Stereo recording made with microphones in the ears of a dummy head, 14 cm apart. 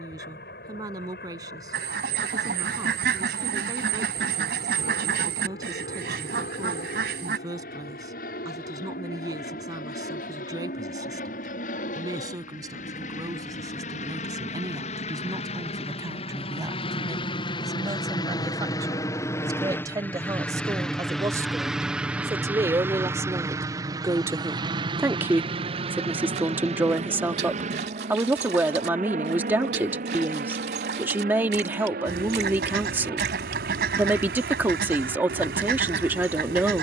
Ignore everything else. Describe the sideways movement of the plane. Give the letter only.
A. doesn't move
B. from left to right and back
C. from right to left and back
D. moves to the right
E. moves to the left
D.